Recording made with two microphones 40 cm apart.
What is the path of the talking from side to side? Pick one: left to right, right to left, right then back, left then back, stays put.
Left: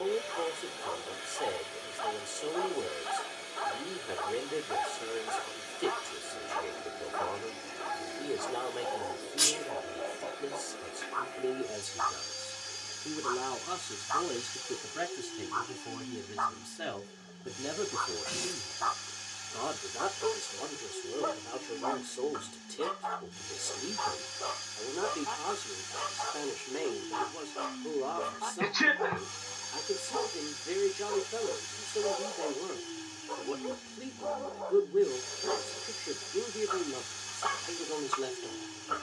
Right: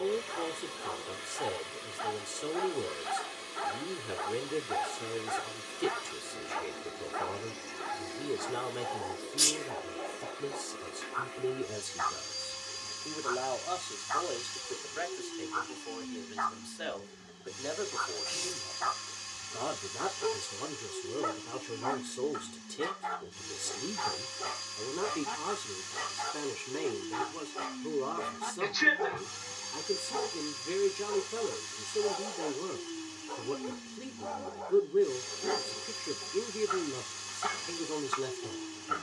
left then back.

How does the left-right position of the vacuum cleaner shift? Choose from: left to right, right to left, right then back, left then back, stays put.
stays put.